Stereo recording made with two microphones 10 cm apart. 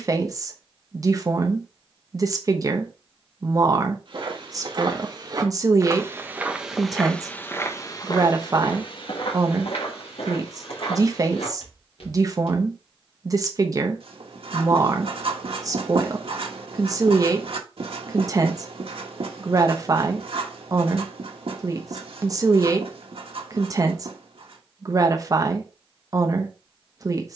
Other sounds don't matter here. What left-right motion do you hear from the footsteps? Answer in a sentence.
In this clip you hear the footsteps travel towards the left.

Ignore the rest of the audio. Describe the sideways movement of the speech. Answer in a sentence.
You can hear the speech stay put.